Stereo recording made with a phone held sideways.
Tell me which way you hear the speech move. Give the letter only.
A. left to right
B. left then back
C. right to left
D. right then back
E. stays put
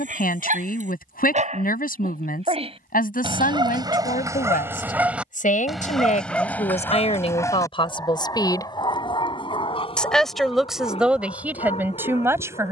A.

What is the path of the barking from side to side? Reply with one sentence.
In this clip you hear the barking go from the right side to the left.